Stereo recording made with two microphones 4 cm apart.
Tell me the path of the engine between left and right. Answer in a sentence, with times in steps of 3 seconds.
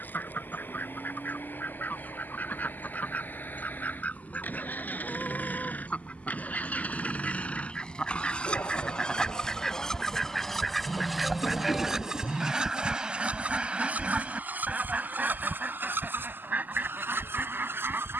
You can hear the engine on the left from 0 s, in the centre from 9 s and on the right from 12 s.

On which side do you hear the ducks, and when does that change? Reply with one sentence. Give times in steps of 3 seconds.
In this clip you hear the ducks on the left from 0 s, in the centre from 9 s and on the right from 12 s.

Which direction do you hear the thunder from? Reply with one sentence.
You can hear the thunder on the left.